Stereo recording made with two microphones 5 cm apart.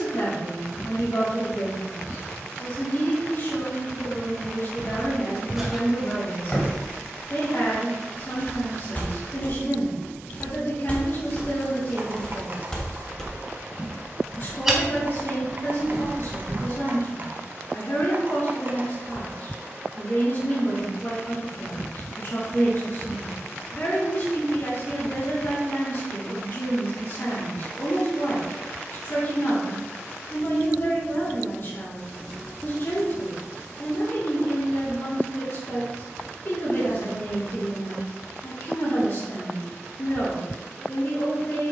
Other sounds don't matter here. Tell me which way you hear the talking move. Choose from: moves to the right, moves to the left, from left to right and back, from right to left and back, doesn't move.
doesn't move.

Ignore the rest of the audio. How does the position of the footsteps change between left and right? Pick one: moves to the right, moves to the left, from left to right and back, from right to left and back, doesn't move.
from right to left and back.